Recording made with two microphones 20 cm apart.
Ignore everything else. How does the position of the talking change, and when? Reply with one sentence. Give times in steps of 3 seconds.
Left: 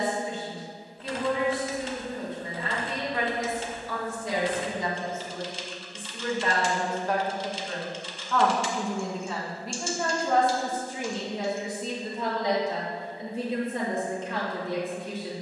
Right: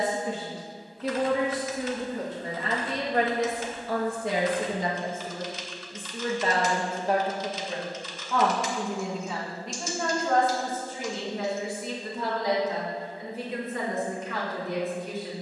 You can hear the talking on the right from 0 s, in the centre from 9 s and on the left from 12 s.